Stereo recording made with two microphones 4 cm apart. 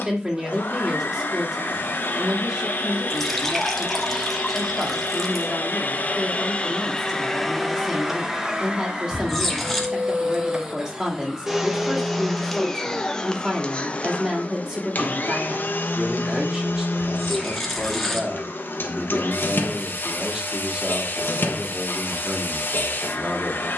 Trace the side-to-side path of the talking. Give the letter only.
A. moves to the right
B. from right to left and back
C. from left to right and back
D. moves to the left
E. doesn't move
E.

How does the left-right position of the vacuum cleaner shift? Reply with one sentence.
In this clip you hear the vacuum cleaner go right and come back.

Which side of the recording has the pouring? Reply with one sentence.
In this clip you hear the pouring in the centre.